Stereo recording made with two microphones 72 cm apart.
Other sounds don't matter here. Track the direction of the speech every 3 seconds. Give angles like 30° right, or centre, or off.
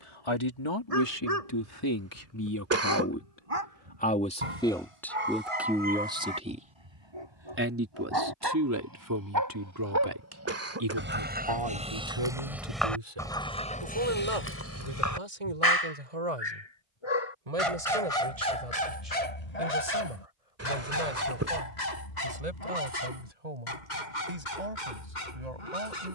30° left, 10° left, 20° right, 30° right, 40° right, 50° right, 50° right, 60° right, 60° right.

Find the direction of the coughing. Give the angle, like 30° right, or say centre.
20° right.